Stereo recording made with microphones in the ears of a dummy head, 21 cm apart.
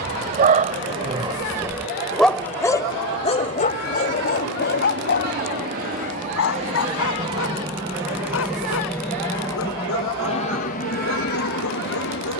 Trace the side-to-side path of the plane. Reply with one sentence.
You can hear the plane go from the right side to the left.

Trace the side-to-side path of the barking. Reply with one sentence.
In this clip you hear the barking move from right to left.